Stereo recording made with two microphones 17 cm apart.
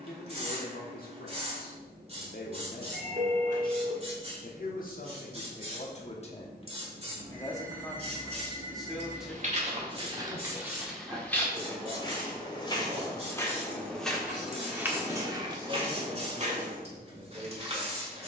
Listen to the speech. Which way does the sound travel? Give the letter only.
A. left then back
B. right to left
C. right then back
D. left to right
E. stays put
D.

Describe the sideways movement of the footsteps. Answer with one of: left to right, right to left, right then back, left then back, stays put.
left then back.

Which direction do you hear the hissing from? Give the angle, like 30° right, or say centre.
40° right.